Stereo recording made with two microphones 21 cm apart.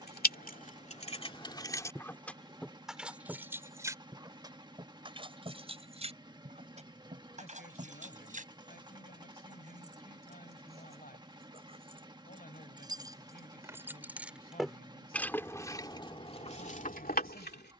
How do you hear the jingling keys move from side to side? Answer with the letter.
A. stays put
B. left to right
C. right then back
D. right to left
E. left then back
C.